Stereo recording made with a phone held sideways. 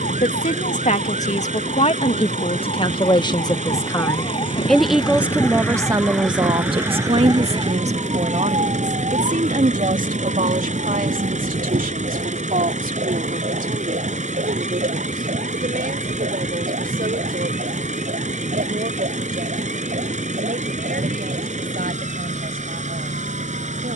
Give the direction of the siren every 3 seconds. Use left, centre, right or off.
left, left, right, right, right, right, right, right.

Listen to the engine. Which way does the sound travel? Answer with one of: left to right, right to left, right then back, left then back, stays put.
stays put.